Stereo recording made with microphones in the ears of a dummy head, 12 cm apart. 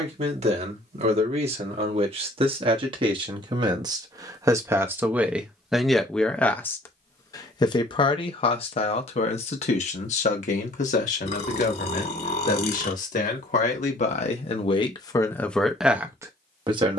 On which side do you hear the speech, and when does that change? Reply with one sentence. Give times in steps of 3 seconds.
In this clip you hear the speech on the right from 0 s, on the left from 6 s and in the centre from 15 s.